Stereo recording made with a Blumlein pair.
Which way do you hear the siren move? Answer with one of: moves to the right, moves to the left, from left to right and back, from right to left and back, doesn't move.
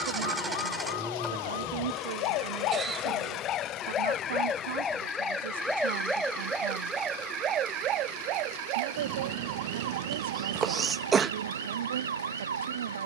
moves to the right.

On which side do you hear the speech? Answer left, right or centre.
right.